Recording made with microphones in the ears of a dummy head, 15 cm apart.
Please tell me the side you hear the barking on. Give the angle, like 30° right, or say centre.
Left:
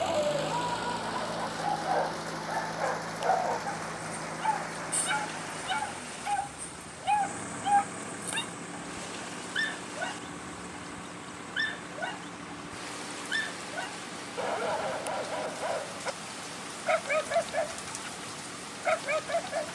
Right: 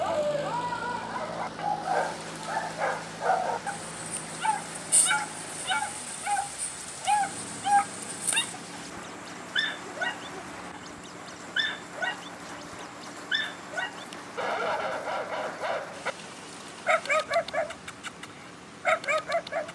40° right.